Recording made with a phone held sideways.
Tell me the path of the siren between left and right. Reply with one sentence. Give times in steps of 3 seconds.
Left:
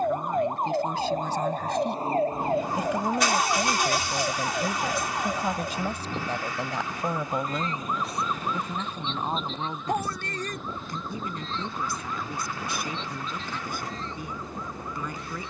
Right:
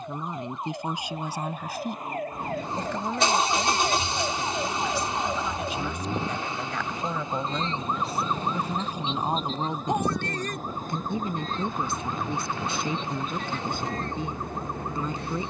In this clip you hear the siren on the left from 0 s, in the centre from 3 s and on the right from 6 s.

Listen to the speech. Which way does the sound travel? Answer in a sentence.
In this clip you hear the speech move from right to left and back again.